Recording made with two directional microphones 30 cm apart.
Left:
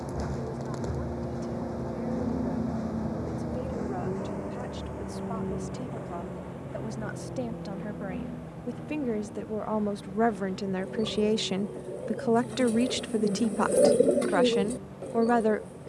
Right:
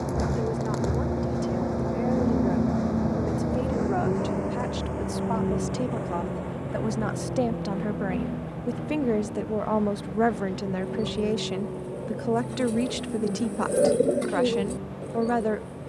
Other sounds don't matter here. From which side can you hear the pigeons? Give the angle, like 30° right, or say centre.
10° left.